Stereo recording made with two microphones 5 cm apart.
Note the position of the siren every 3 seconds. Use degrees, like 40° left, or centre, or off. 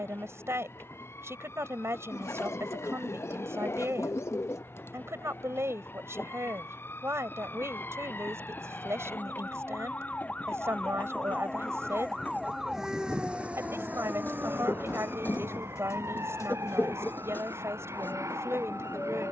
60° left, 50° left, 50° left, 20° left, 30° right, 70° right, 80° right.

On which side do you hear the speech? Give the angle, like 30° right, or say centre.
60° right.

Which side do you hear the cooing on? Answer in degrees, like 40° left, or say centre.
70° left.